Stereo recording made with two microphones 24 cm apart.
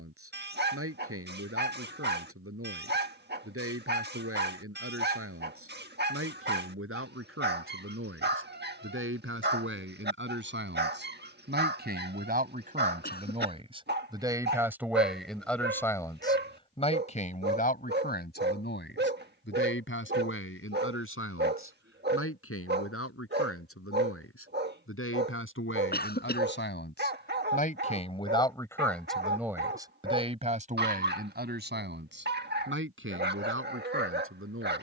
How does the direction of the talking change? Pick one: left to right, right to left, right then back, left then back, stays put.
left then back.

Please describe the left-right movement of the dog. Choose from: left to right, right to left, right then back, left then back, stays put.
stays put.